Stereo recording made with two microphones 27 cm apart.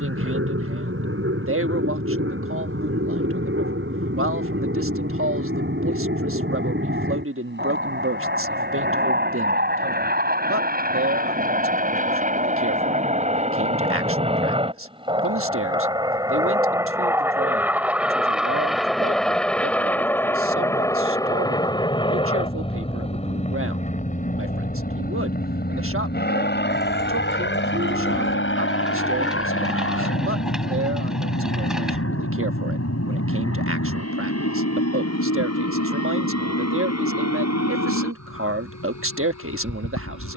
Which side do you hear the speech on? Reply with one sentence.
In this clip you hear the speech on the right.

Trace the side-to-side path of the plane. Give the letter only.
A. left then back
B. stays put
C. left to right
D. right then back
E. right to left
E.